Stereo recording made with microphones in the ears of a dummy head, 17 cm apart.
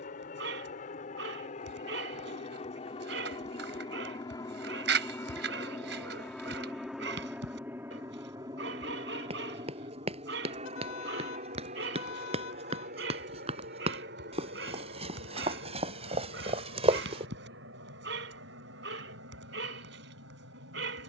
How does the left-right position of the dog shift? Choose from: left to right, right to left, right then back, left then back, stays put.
stays put.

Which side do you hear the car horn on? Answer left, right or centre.
left.